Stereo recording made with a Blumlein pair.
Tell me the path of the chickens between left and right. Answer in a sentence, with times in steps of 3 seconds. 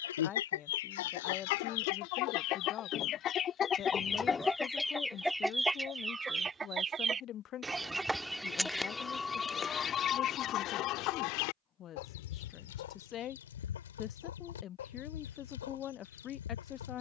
You can hear the chickens on the left from 0 s, in the centre from 3 s and on the left from 9 s.